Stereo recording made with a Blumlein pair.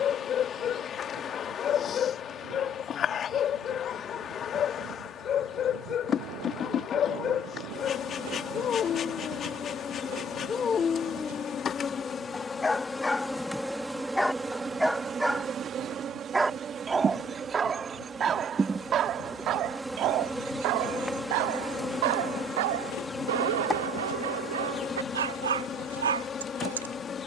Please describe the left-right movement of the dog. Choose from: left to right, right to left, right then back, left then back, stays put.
left to right.